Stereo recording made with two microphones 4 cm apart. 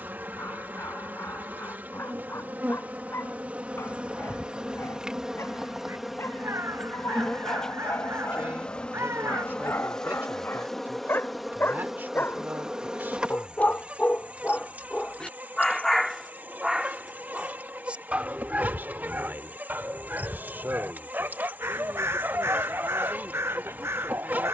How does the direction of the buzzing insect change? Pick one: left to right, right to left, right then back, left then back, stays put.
left then back.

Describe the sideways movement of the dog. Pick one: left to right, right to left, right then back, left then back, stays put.
left to right.